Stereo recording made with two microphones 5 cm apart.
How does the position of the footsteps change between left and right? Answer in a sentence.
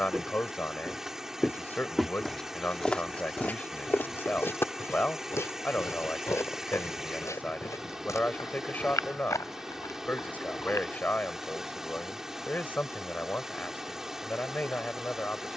You can hear the footsteps move to the left.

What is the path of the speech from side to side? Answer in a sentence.
In this clip you hear the speech stay put.